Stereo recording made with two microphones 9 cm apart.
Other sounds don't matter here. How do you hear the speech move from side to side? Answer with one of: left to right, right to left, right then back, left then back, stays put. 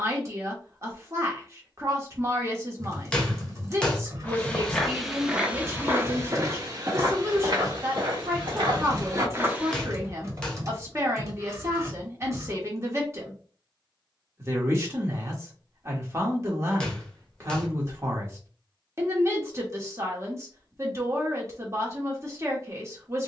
stays put.